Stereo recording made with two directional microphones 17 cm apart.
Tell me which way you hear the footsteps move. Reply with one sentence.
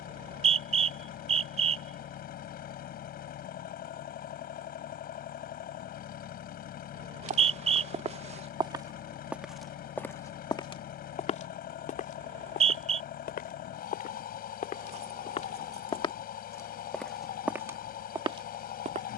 You can hear the footsteps go left and come back.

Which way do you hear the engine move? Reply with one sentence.
In this clip you hear the engine stay put.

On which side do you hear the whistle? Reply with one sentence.
In this clip you hear the whistle on the right.